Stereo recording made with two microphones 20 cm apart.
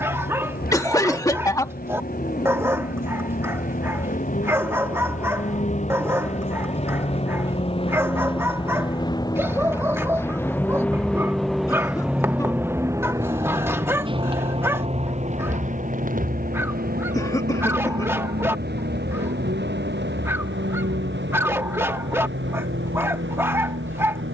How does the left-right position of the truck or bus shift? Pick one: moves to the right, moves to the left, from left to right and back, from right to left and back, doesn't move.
moves to the right.